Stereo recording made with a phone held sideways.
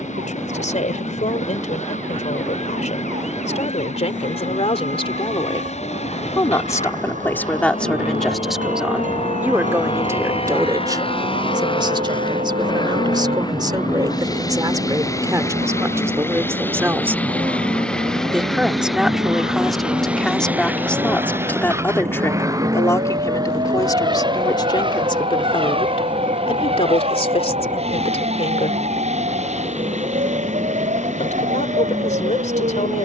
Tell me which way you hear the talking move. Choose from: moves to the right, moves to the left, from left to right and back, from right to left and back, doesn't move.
from left to right and back.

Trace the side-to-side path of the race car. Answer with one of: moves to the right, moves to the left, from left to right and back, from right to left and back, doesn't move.
moves to the right.